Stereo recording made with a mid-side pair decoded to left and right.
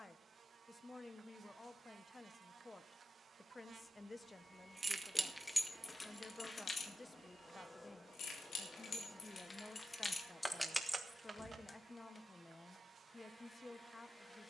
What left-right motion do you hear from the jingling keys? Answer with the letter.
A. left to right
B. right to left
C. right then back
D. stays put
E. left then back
E.